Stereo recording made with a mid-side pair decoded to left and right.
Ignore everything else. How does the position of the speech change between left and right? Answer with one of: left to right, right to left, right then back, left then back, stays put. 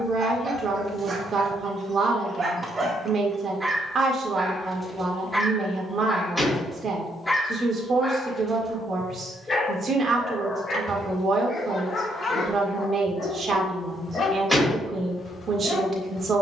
stays put.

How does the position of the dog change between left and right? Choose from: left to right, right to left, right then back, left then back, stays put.
right to left.